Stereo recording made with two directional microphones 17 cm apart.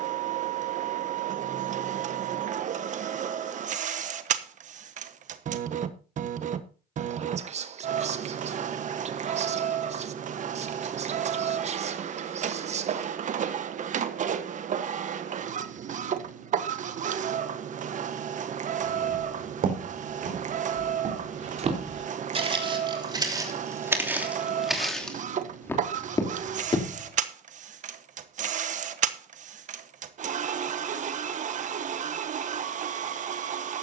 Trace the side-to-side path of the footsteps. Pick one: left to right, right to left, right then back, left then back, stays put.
right to left.